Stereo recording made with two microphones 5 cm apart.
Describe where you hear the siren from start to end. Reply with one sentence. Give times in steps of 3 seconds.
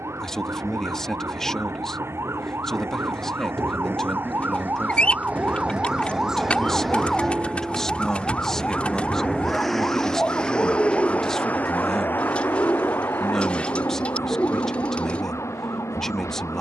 You can hear the siren on the right from 0 s, in the centre from 6 s and on the left from 9 s.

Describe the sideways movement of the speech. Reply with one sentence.
You can hear the speech stay in one place.